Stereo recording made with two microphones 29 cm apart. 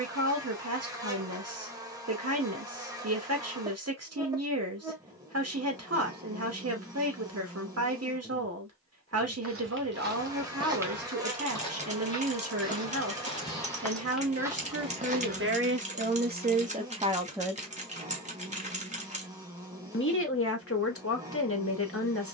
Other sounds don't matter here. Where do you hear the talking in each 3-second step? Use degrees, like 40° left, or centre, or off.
60° right, 60° right, 60° right, 60° right, 60° right, 30° right, 50° left, 50° left.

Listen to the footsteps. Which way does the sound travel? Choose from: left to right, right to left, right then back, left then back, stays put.
left then back.